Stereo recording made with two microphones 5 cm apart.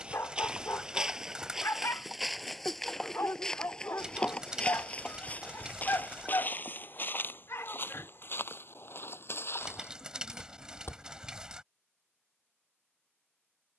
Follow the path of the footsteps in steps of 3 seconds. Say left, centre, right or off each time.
centre, left, left, left, off.